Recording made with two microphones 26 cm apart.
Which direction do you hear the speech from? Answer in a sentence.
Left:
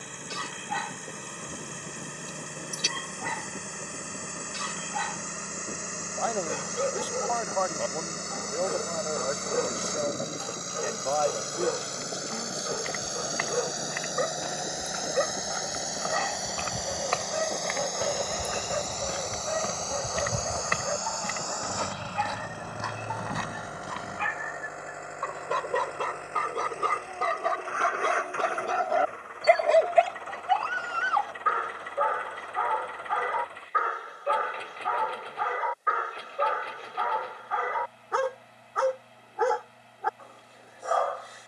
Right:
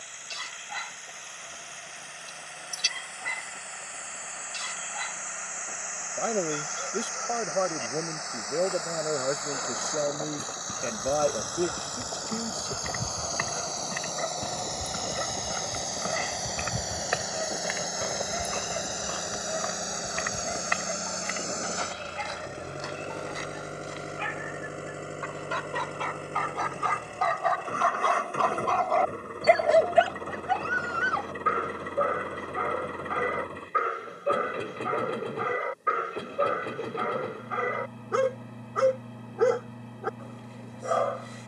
In this clip you hear the speech on the right.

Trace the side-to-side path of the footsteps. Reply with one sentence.
In this clip you hear the footsteps move from right to left.